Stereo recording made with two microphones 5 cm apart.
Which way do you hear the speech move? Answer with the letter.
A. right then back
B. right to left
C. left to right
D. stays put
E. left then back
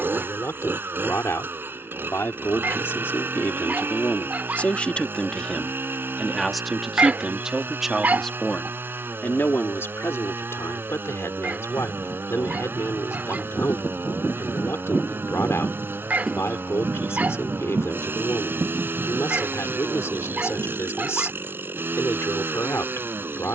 A.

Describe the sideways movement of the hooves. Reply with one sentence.
In this clip you hear the hooves go from the left side to the right.